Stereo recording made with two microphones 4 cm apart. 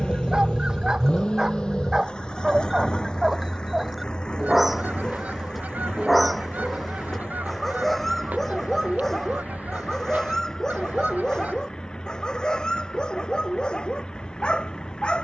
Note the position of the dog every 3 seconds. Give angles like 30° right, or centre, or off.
20° right, 10° right, centre, 10° left, 20° left.